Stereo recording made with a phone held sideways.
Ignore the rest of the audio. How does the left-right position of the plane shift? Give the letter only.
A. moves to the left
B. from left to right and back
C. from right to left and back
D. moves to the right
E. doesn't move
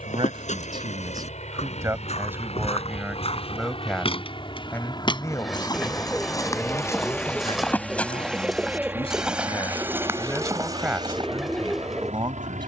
D.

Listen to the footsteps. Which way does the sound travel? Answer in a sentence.
You can hear the footsteps travel towards the right.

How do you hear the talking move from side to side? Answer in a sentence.
In this clip you hear the talking go left and come back.